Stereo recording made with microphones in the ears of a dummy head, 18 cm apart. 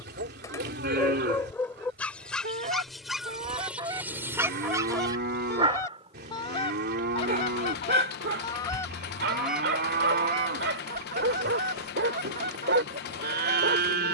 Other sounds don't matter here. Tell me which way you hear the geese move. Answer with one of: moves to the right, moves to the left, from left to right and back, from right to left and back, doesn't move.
from right to left and back.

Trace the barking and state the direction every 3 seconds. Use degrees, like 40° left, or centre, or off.
10° left, 10° right, 50° right, 60° right, 60° right.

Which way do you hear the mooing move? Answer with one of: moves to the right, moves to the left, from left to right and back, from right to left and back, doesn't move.
doesn't move.